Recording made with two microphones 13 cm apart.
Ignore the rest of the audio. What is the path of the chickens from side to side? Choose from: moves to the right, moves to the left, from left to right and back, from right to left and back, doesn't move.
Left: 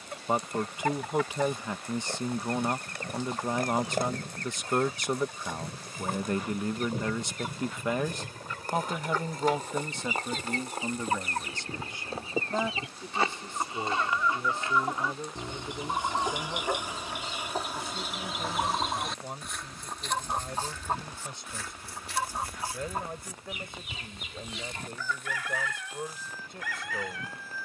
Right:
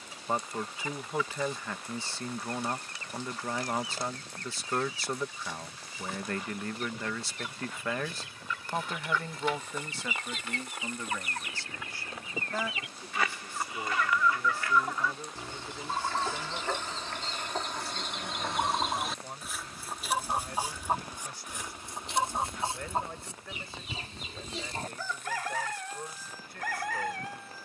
moves to the right.